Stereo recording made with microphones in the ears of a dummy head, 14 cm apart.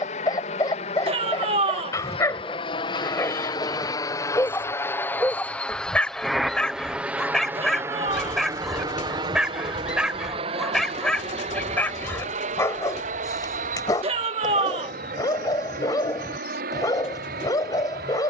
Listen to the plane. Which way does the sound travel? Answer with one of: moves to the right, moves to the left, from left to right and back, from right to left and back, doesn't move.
moves to the right.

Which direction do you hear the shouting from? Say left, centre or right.
right.